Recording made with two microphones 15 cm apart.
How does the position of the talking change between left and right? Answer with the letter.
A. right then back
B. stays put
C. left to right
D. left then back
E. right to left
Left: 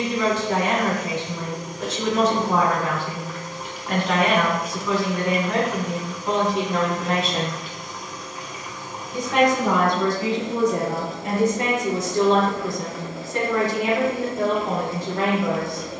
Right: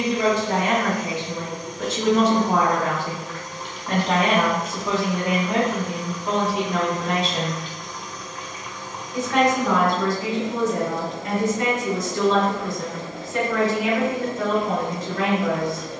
E.